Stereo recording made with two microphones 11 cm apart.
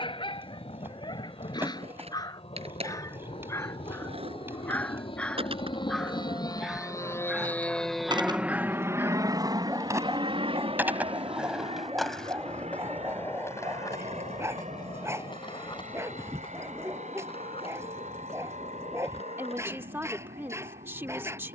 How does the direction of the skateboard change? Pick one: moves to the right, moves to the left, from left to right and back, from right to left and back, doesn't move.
moves to the left.